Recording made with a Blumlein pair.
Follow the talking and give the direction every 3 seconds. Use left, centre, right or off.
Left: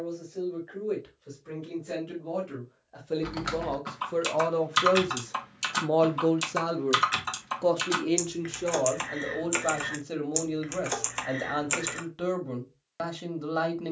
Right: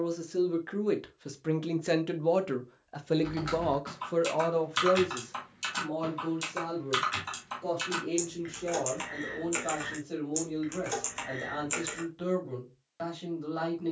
right, centre, left, left, left.